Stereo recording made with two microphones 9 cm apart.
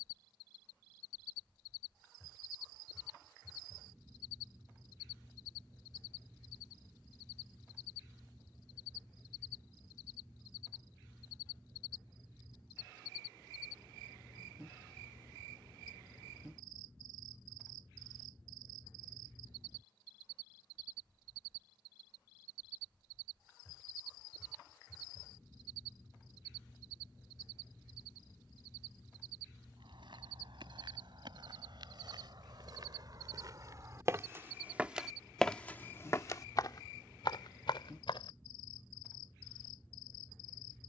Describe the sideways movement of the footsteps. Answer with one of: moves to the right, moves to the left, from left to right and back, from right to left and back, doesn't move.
moves to the left.